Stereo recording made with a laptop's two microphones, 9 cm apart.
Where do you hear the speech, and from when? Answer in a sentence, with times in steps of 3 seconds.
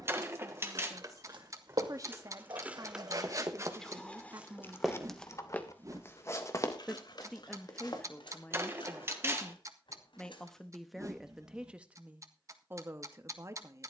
You can hear the speech on the right from 0 s, in the centre from 6 s and on the right from 12 s.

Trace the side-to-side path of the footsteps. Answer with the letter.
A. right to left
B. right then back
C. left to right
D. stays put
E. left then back
A.